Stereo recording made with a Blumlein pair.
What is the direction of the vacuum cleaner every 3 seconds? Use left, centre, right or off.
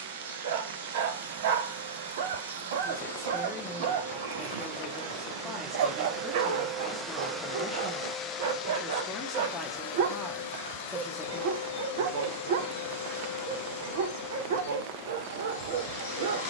right, right, centre, left, left, left.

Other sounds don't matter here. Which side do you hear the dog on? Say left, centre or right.
right.